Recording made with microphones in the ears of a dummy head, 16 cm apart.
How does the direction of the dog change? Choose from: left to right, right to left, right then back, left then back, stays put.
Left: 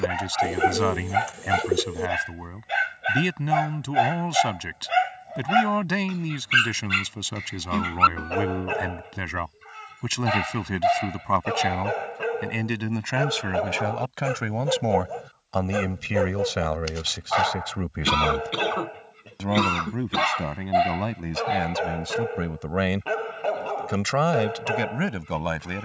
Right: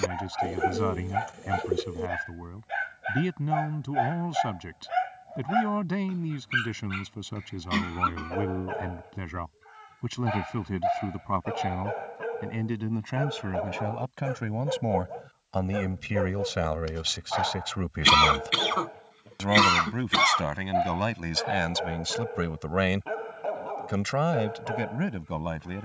stays put.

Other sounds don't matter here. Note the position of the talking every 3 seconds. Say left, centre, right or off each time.
left, left, left, left, left, centre, right, right, left.